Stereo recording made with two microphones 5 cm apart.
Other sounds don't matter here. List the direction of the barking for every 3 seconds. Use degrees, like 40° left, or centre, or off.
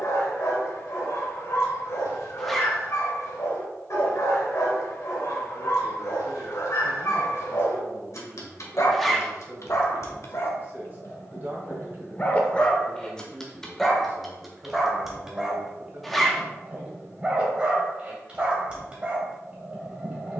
80° left, 80° left, 70° left, 50° left, 10° left, 20° right, 20° right.